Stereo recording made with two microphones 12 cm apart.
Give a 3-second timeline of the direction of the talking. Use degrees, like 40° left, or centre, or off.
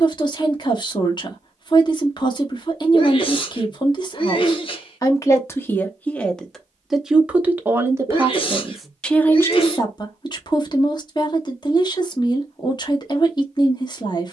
30° left, 30° left, 10° right, 30° left, 30° left.